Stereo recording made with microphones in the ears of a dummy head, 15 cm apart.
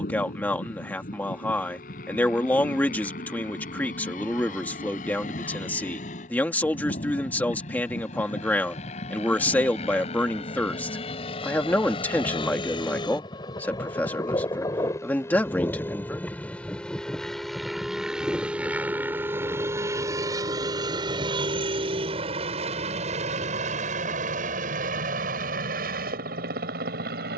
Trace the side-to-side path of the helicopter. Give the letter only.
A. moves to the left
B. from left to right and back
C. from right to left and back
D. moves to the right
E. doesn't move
D.